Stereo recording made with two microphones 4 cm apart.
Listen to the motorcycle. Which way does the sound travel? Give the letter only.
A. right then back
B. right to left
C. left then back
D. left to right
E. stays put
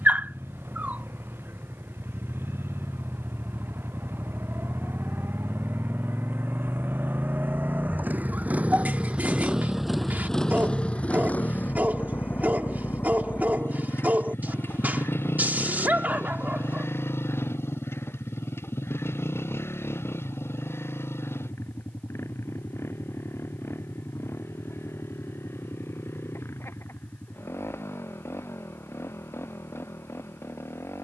B.